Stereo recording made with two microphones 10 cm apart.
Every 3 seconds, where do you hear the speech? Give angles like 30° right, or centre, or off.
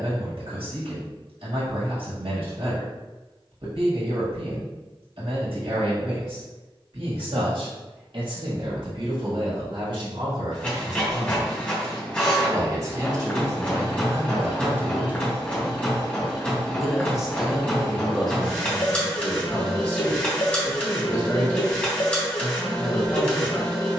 80° right, 80° right, 70° right, 60° right, 40° right, centre, 20° left, 30° left.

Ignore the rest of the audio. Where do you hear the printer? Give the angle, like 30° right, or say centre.
10° left.